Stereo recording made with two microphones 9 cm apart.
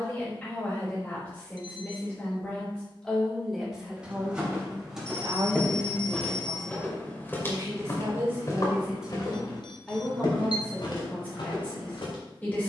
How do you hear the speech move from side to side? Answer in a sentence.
You can hear the speech move from left to right and back again.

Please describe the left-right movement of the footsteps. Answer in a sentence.
You can hear the footsteps travel towards the left.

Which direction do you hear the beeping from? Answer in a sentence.
You can hear the beeping on the left.